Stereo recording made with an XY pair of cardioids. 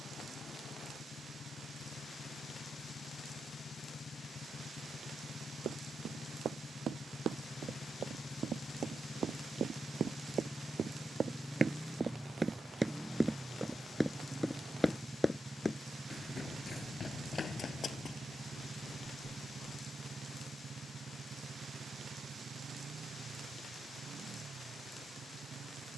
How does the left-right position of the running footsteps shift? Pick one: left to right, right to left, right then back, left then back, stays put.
right to left.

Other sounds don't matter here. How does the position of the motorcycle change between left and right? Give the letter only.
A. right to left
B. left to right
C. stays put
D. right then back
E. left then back
B.